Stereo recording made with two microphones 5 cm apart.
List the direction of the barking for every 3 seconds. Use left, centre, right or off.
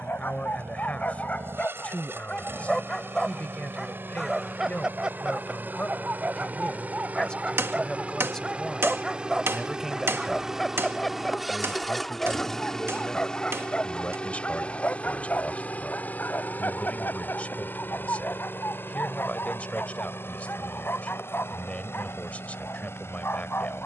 left, centre, right, centre, left, left, left, left.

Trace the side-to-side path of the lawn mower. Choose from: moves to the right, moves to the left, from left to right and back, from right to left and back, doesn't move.
moves to the left.